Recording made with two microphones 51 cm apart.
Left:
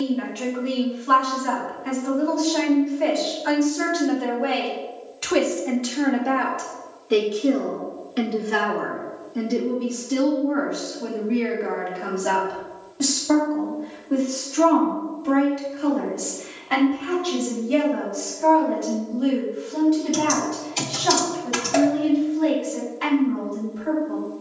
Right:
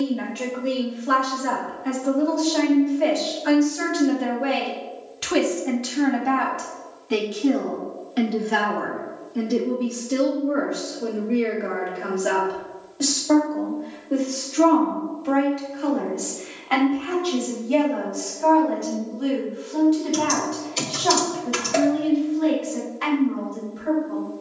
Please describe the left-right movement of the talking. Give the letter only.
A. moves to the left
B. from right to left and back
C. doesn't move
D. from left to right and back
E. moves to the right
A.